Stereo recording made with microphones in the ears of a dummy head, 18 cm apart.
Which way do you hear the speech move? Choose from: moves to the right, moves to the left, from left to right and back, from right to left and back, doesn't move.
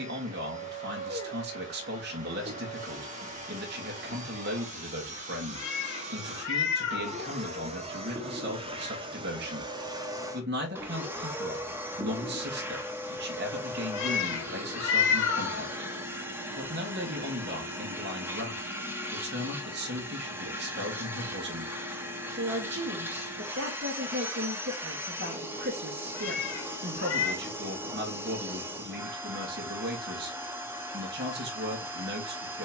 doesn't move.